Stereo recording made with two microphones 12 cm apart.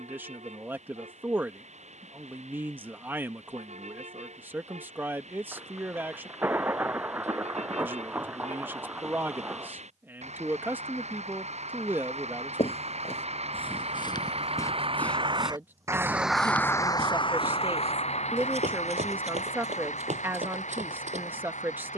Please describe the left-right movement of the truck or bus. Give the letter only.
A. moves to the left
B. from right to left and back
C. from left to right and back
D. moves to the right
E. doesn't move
A.